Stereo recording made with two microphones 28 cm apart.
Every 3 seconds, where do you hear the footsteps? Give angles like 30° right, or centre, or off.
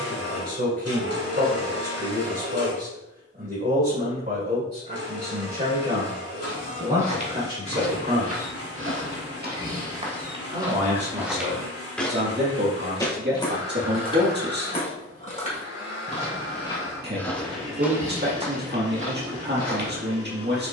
off, off, 60° right, 20° right, 20° left, 10° left, 40° right.